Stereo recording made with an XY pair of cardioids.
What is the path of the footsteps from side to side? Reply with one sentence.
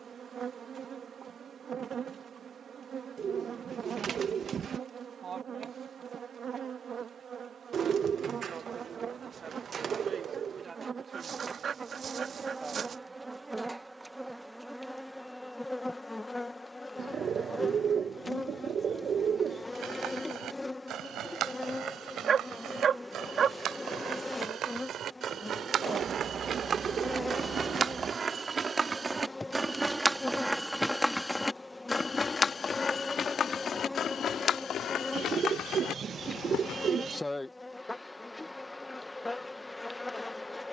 In this clip you hear the footsteps go from the right side to the left.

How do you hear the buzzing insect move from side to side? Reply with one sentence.
In this clip you hear the buzzing insect go from the right side to the left.